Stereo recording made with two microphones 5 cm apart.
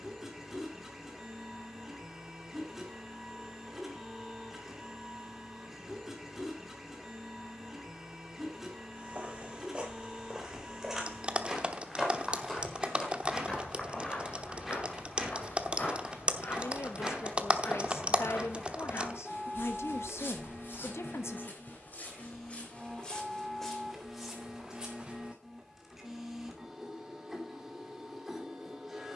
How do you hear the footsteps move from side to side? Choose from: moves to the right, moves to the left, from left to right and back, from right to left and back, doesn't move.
from right to left and back.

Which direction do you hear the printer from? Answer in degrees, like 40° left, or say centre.
10° right.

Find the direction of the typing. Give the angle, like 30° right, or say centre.
30° right.